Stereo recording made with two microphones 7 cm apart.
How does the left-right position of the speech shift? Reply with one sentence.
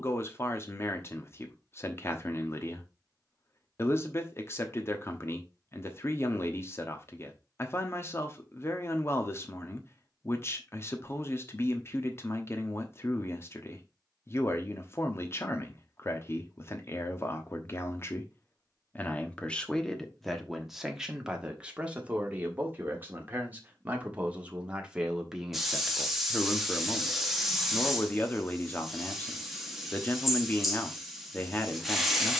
You can hear the speech go right and come back.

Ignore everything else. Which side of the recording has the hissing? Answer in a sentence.
You can hear the hissing in the centre.